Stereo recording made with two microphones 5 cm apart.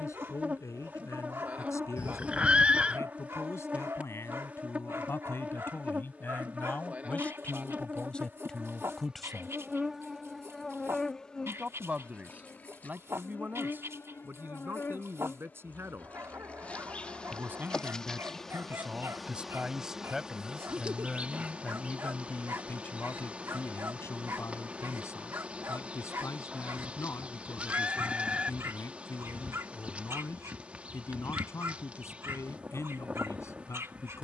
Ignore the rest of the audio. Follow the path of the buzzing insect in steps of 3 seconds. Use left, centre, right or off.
right, right, right, centre, left, left, centre, right, right, right, right, right.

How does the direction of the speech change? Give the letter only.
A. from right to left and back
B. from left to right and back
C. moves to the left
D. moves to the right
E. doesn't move
B.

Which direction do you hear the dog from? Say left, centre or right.
right.